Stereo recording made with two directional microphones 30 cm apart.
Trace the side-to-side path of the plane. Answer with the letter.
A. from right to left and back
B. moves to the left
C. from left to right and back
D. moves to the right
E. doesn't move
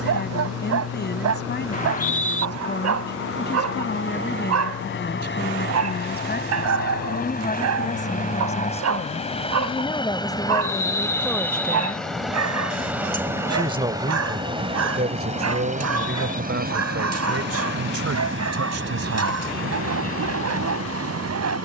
D.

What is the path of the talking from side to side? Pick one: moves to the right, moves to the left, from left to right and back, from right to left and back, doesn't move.
moves to the right.